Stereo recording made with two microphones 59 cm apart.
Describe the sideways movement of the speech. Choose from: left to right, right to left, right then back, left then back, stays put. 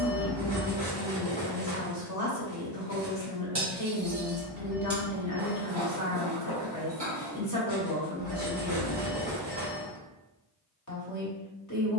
stays put.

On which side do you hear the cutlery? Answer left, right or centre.
right.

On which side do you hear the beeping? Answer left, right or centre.
right.